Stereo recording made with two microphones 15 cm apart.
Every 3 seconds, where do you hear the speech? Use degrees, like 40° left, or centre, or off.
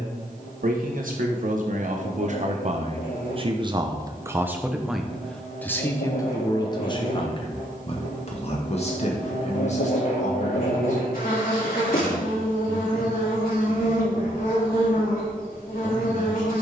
60° right, 10° right, 40° left, 50° left, 60° left, 60° left.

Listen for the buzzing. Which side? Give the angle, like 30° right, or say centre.
80° left.